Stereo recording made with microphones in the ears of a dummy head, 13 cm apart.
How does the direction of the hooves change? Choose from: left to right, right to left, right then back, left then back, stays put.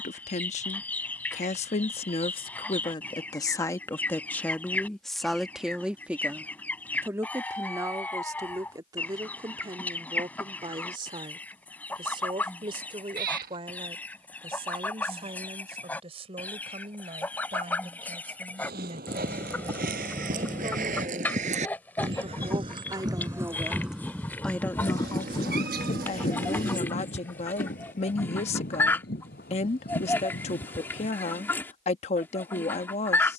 right to left.